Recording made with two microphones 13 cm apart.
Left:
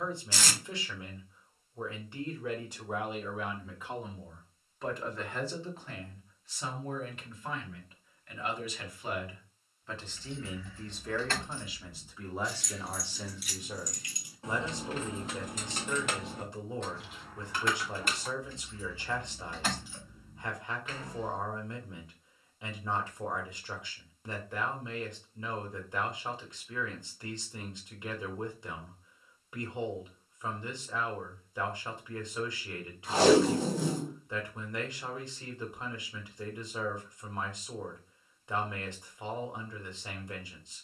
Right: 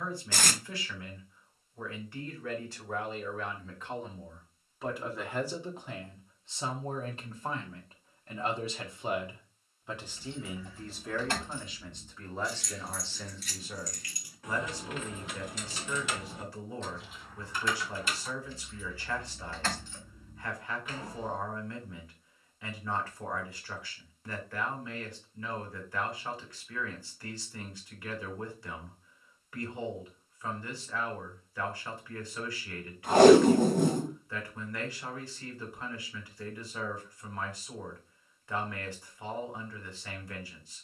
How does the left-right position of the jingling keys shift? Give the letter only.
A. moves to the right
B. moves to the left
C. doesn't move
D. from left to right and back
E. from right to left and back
E.